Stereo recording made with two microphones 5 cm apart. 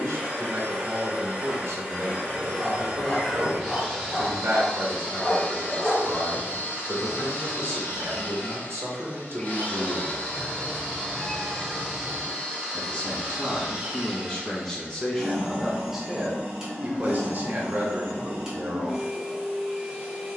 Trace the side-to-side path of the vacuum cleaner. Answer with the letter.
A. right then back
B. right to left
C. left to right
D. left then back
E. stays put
D.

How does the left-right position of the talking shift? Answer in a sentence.
You can hear the talking go left and come back.